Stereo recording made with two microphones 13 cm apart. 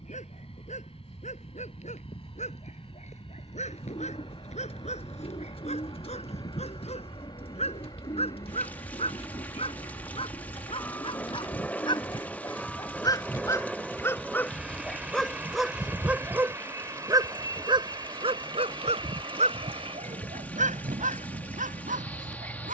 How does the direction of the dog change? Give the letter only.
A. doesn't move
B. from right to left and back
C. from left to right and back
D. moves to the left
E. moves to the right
E.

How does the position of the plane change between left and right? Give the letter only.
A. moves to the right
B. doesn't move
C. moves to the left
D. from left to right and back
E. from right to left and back
A.